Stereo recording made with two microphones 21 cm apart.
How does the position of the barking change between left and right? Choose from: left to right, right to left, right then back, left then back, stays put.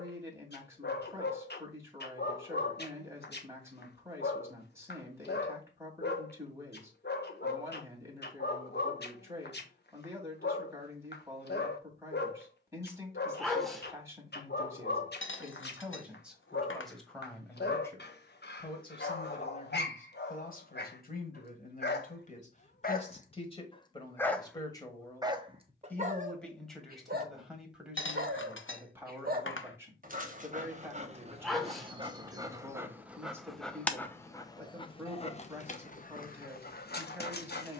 right then back.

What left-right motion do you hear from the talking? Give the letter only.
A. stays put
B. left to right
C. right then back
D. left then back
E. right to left
D.